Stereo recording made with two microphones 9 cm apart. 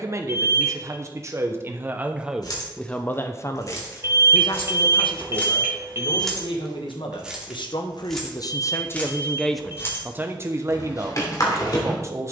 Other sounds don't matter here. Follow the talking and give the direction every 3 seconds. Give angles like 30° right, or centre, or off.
20° right, 50° left, 60° left, 20° right.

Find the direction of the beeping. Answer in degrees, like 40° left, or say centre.
30° right.